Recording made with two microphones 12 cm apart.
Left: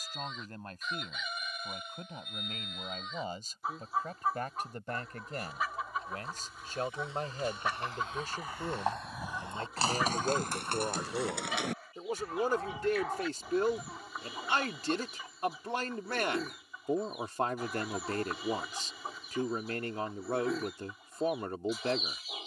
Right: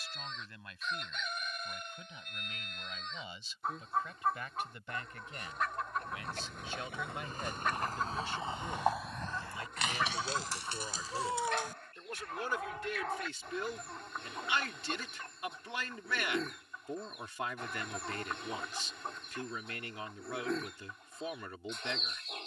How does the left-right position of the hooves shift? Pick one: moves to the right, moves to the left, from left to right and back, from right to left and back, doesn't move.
moves to the left.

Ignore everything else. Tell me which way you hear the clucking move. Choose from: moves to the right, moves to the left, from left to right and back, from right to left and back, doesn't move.
doesn't move.